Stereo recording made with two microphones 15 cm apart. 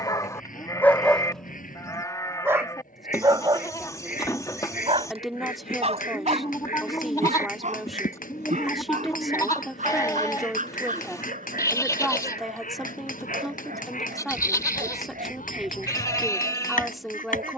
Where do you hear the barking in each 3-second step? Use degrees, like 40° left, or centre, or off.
10° left, 30° right, 50° right, 60° right, 60° right, 60° right.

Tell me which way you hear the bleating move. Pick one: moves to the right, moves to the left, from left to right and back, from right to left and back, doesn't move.
doesn't move.